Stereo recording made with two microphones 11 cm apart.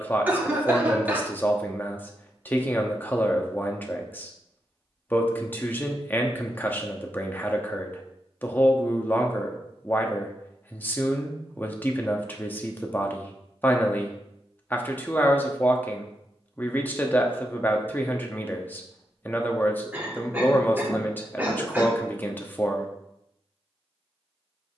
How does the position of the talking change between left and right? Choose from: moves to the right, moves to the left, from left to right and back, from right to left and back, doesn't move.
doesn't move.